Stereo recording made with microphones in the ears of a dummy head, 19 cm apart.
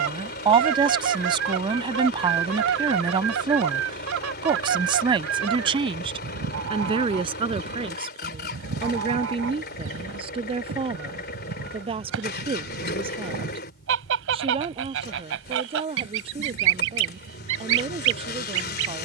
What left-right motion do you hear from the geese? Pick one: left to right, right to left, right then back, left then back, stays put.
stays put.